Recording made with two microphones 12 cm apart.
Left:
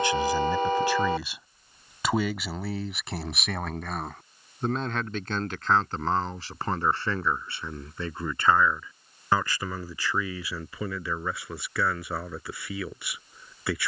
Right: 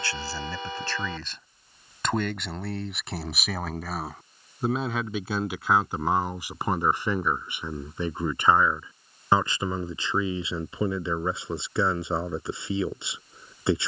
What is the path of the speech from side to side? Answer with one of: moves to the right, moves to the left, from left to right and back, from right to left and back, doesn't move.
moves to the right.